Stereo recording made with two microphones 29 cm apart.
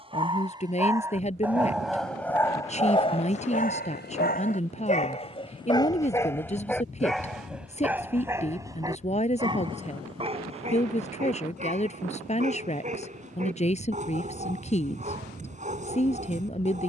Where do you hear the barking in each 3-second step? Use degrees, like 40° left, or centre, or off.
centre, 20° left, centre, 20° right, 20° right, 20° right.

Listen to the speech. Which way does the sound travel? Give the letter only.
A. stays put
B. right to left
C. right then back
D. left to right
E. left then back
A.